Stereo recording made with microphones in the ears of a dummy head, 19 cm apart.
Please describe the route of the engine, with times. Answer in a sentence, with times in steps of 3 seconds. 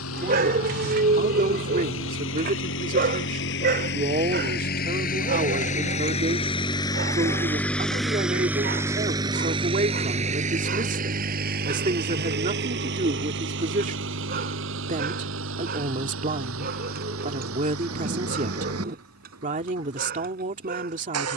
In this clip you hear the engine on the left from 0 s, in the centre from 6 s and on the right from 9 s.